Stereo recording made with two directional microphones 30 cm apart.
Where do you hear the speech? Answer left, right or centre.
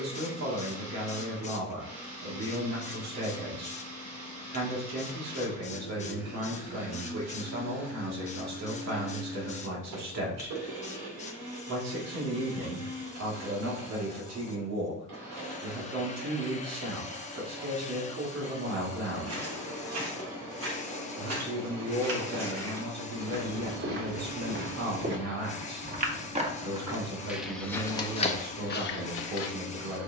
right.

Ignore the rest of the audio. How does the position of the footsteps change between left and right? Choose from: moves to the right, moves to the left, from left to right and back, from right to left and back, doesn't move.
moves to the left.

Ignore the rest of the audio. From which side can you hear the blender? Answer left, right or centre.
right.